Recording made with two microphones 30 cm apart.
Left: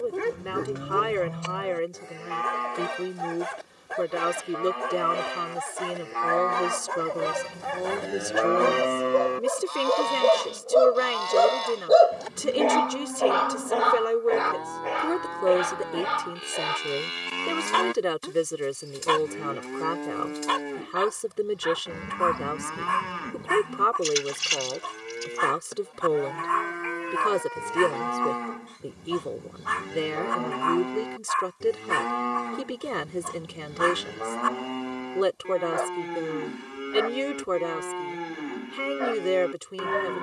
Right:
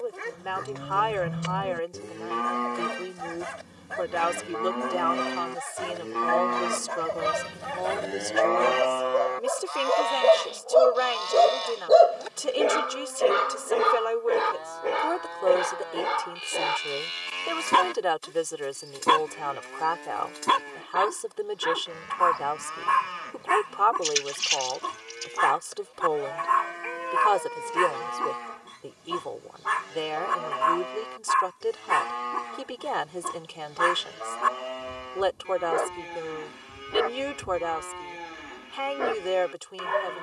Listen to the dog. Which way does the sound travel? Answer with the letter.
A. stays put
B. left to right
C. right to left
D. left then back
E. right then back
B.